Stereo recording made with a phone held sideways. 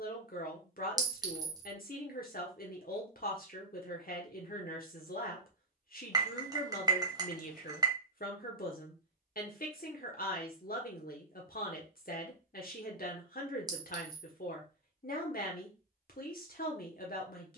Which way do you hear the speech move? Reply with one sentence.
In this clip you hear the speech stay in one place.